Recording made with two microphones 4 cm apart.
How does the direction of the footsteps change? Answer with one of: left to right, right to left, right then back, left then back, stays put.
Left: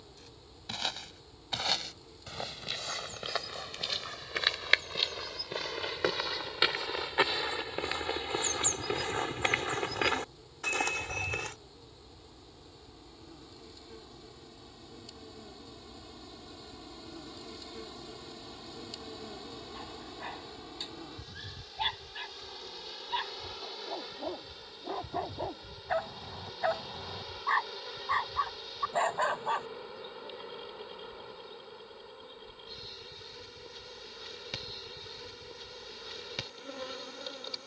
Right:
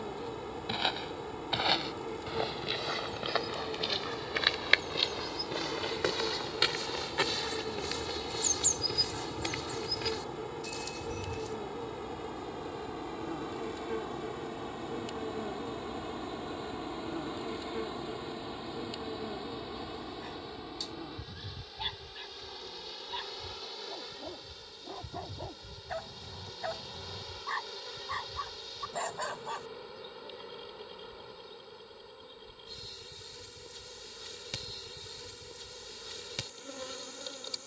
right to left.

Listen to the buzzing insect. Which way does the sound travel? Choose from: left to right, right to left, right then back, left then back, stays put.
right to left.